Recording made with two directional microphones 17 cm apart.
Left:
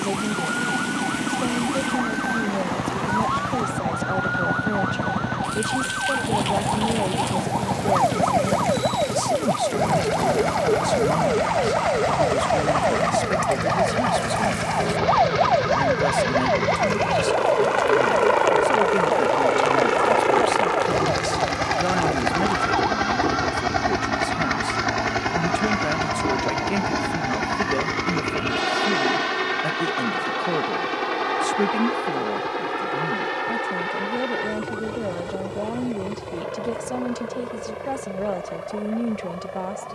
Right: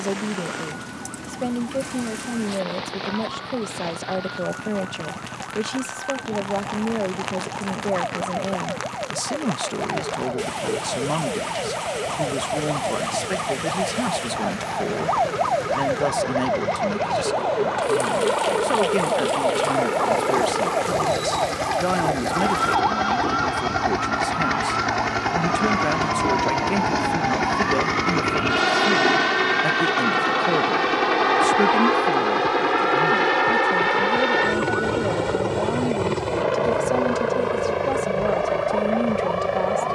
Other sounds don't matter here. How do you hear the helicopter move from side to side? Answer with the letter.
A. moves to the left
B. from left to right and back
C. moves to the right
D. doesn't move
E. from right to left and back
C.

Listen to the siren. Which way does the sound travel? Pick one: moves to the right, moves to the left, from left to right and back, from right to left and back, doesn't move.
moves to the right.